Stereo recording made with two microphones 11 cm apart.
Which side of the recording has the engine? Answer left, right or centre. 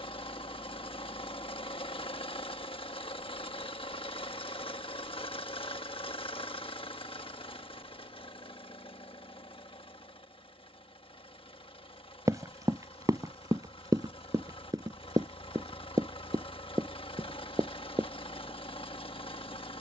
left.